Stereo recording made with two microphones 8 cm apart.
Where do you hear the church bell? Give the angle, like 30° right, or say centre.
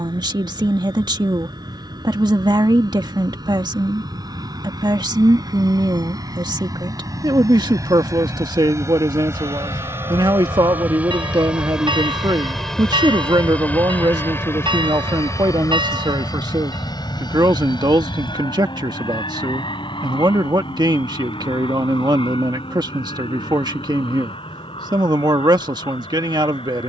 70° right.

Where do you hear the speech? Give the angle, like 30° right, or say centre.
60° right.